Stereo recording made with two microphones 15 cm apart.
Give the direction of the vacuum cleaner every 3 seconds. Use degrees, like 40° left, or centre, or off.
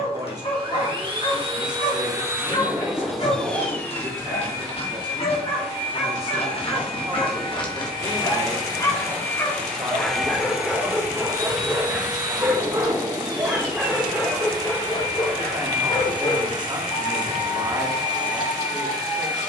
30° right, 20° left, 30° left, 10° right, 30° right, 30° right, 30° right.